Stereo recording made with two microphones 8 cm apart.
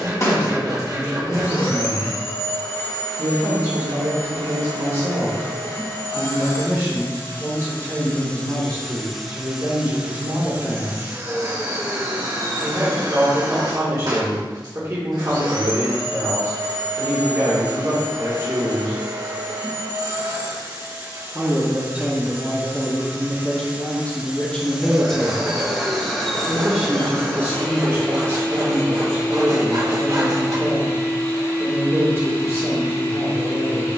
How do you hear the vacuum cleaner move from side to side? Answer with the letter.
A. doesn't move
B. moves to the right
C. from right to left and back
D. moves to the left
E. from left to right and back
E.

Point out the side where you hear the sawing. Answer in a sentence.
You can hear the sawing on the right.